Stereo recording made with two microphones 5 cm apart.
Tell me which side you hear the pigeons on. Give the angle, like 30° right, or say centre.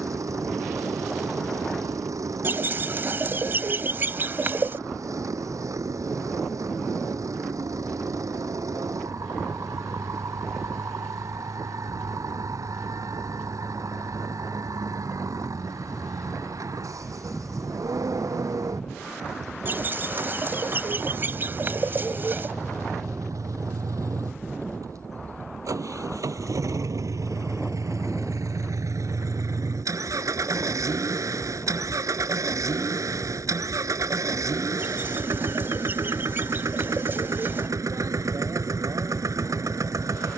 40° right.